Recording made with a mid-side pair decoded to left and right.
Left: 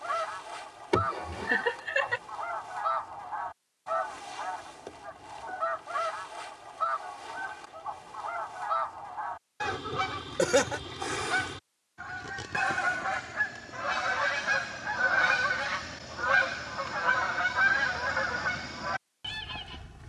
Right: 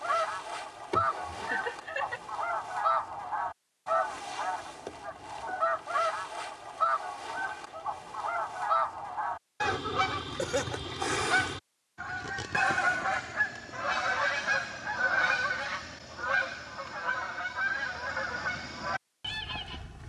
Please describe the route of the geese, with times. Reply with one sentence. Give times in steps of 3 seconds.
You can hear the geese on the right from 0 s, in the centre from 12 s, on the left from 15 s and in the centre from 18 s.